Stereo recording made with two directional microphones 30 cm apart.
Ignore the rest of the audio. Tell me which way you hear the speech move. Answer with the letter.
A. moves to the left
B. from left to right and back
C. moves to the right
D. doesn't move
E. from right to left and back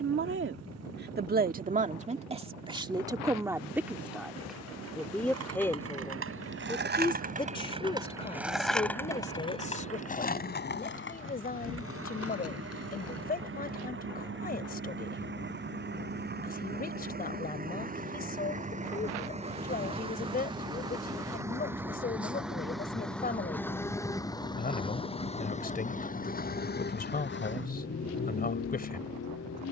A.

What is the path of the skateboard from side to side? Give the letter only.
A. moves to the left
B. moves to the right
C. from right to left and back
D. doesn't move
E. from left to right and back
A.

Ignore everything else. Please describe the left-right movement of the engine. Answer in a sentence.
In this clip you hear the engine go from the right side to the left.